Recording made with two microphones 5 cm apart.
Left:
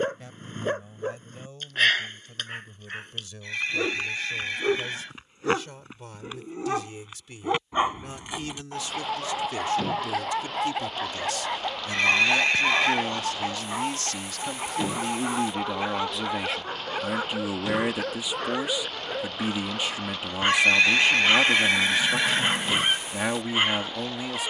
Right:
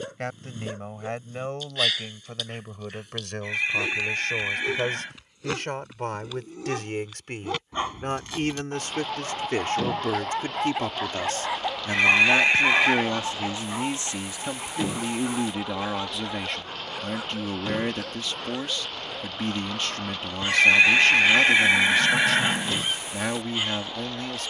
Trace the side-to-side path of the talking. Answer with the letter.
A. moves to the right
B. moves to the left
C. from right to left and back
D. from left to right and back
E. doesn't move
B.